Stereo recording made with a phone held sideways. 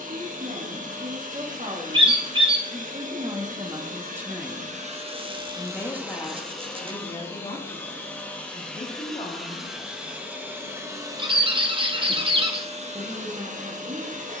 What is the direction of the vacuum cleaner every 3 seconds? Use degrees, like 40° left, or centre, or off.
60° right, 40° right, 10° left, 10° right, 50° right.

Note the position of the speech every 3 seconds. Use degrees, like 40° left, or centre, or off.
50° right, 10° right, 30° left, 40° left, 50° right.